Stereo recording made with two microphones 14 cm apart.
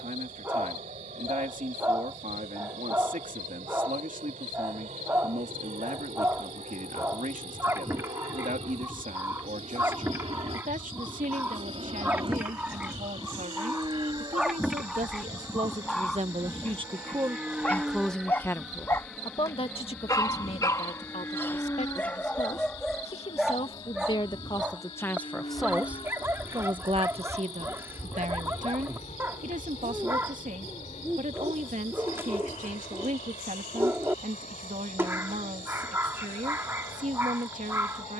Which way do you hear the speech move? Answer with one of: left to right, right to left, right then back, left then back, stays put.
left then back.